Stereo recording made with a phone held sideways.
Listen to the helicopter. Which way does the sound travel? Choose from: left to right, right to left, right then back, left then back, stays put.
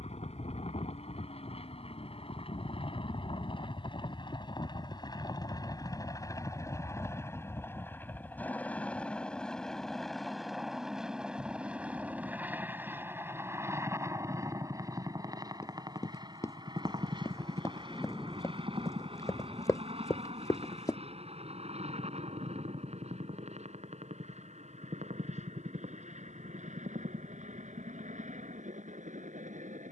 left to right.